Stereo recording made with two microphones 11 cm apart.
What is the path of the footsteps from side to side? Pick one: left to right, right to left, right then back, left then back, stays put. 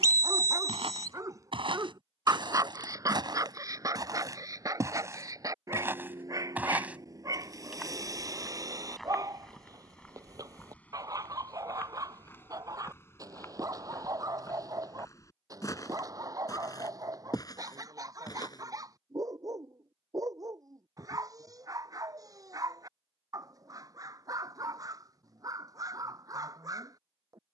right to left.